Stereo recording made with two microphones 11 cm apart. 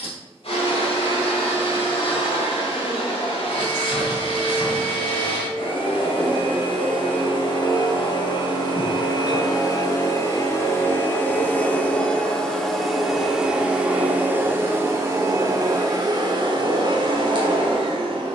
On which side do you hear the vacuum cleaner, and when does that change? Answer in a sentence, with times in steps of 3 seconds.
In this clip you hear the vacuum cleaner on the left from 0 s, in the centre from 12 s and on the right from 15 s.